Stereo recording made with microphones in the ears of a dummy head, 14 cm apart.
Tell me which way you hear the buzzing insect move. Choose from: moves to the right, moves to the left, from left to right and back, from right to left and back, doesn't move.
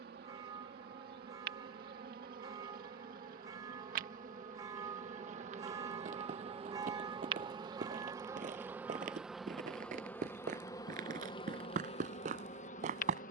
moves to the left.